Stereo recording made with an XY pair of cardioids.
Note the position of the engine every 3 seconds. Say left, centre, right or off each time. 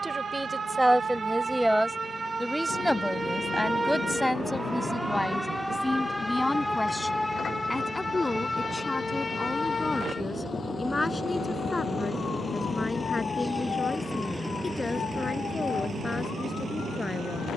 left, left, left, left, centre, right.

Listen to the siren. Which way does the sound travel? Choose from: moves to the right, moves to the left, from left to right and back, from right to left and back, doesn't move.
moves to the left.